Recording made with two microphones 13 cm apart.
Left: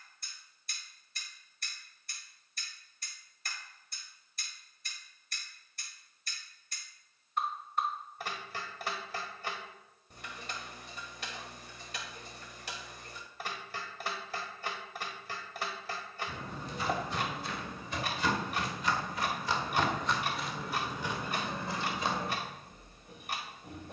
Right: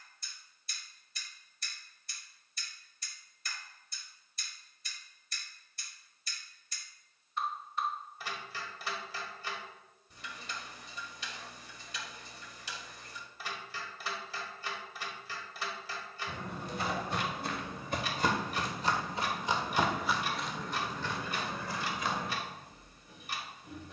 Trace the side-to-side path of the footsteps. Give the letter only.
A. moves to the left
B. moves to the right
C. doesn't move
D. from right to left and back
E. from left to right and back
A.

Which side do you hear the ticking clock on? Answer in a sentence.
You can hear the ticking clock on the left.